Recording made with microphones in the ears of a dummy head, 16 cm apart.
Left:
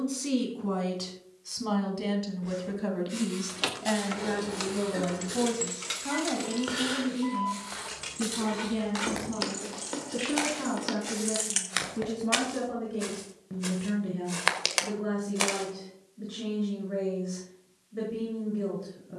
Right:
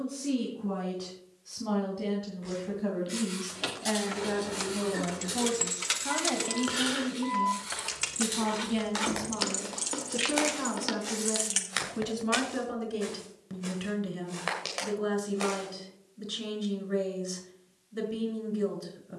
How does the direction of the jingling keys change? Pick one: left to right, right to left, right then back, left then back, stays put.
right then back.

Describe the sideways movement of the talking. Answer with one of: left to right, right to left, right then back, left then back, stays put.
left to right.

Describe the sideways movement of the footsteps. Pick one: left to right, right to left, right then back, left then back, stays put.
right to left.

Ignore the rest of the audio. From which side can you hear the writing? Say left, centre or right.
centre.